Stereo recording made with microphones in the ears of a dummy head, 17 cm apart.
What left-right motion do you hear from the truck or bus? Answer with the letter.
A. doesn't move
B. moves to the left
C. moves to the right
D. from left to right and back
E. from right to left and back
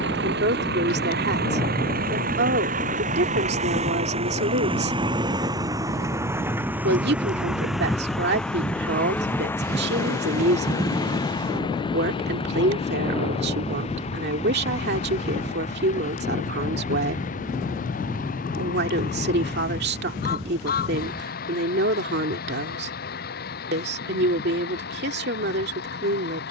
B.